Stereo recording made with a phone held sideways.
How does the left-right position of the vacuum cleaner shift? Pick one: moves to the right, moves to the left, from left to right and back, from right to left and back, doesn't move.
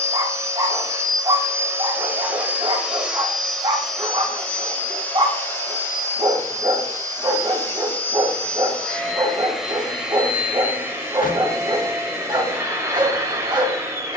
from right to left and back.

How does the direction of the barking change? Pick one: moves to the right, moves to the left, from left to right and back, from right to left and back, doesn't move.
doesn't move.